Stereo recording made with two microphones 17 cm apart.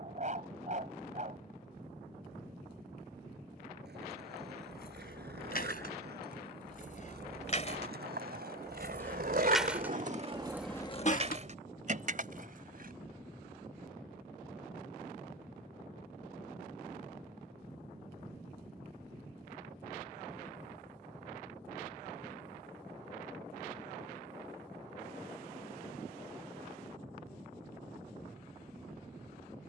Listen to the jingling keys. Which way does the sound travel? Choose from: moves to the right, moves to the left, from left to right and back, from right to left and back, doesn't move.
moves to the right.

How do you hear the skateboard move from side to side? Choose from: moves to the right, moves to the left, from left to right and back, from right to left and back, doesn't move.
moves to the left.